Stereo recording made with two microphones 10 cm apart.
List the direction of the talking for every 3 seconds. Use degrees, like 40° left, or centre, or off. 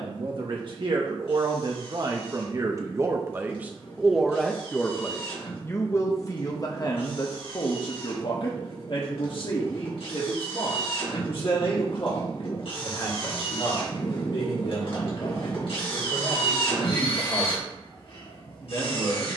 50° right, centre, 40° left, 60° left, 70° left, 70° left, 80° left.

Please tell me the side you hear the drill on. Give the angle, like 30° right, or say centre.
80° left.